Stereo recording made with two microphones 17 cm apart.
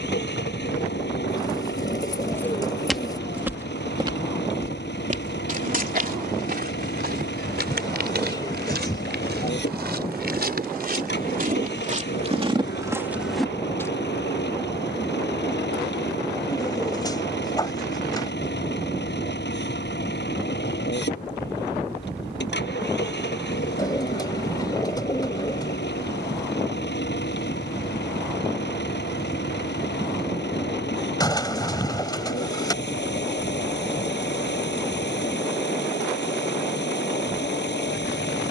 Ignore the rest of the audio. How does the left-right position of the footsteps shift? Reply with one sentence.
You can hear the footsteps go right and come back.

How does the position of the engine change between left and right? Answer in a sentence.
In this clip you hear the engine stay put.